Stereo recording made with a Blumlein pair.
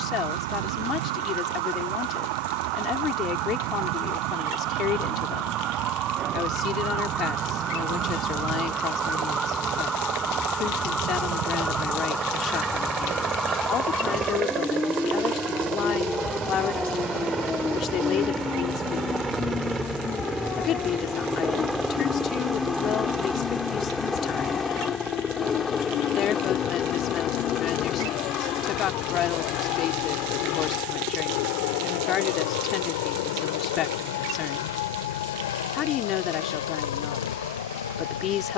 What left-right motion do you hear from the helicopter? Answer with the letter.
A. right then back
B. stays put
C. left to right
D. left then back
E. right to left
E.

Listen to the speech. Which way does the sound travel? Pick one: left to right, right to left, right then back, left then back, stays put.
stays put.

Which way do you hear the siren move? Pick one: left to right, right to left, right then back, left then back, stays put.
right to left.